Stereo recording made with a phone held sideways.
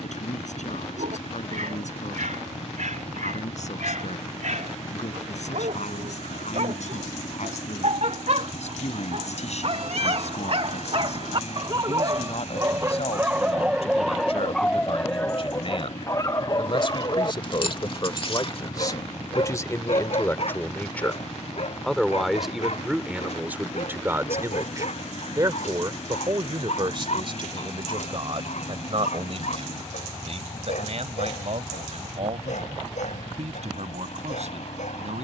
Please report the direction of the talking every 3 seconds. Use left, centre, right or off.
left, left, left, left, left, left, left, centre, right, right, right, right.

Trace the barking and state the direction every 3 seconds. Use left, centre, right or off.
right, right, right, right, centre, left, left, left, left, left, left, left.